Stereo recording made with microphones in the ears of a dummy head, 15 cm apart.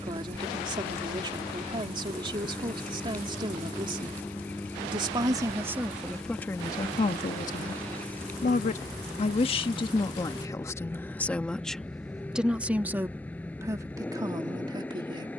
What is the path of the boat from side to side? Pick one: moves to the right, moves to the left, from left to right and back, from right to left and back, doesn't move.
doesn't move.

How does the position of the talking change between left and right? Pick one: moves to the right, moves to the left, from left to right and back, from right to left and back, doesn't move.
from right to left and back.